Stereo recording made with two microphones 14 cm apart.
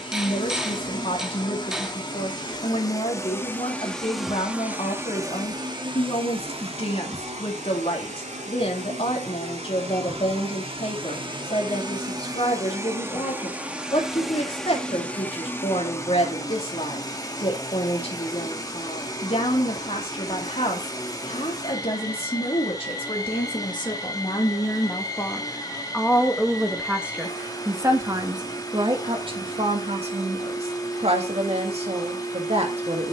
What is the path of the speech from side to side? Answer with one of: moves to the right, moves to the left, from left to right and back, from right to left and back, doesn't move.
moves to the right.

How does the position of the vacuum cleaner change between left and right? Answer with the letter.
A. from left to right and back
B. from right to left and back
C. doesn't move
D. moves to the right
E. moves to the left
A.